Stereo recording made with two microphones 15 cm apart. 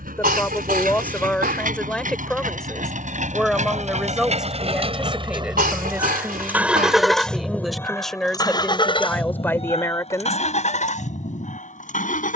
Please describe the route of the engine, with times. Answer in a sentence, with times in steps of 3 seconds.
You can hear the engine on the right from 0 s, in the centre from 6 s and on the left from 9 s.